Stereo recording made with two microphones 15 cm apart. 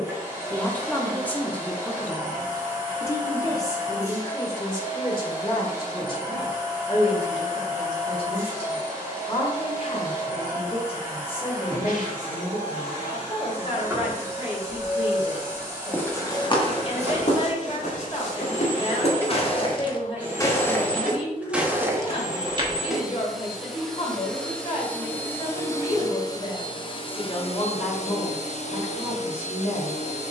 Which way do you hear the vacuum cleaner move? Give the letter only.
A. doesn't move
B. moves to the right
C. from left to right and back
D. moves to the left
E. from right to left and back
D.